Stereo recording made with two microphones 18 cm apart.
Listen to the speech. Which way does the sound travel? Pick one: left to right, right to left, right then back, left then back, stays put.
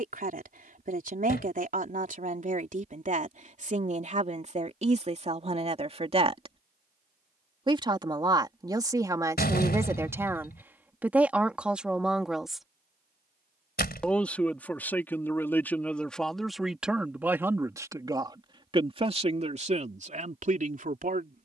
left then back.